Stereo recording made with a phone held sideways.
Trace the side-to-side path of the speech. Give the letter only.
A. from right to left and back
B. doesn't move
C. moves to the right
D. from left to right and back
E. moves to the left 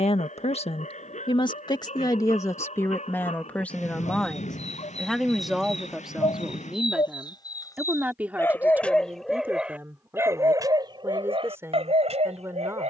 C.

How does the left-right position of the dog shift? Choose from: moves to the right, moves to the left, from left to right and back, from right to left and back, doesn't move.
moves to the right.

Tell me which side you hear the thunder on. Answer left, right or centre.
left.